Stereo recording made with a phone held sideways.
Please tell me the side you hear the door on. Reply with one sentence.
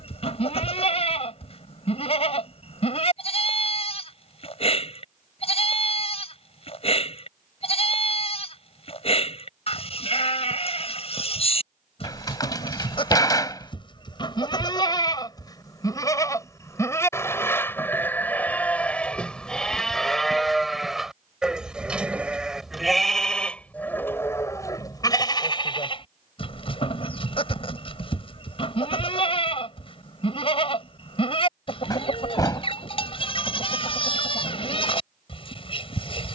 In this clip you hear the door on the left.